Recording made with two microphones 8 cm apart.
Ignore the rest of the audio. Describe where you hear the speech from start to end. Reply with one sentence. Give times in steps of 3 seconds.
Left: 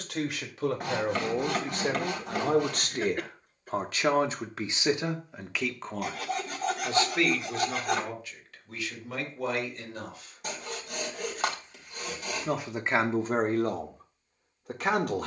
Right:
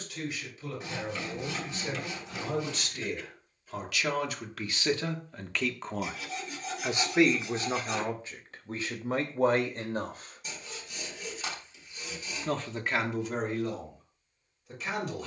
You can hear the speech on the left from 0 s, on the right from 6 s and on the left from 12 s.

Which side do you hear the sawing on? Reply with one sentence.
In this clip you hear the sawing on the left.